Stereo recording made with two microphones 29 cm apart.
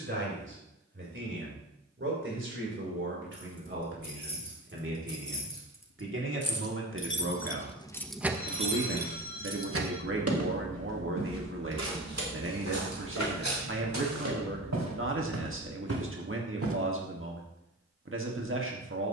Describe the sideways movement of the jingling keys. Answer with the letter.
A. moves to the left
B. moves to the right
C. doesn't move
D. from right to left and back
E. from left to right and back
B.